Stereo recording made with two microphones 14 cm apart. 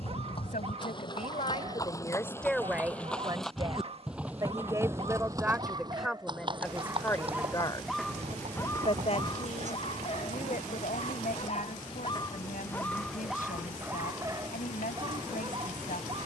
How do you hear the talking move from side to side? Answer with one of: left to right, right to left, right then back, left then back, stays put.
right then back.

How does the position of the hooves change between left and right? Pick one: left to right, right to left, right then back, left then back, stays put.
left to right.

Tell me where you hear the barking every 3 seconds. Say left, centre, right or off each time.
right, right, centre, left, centre, right.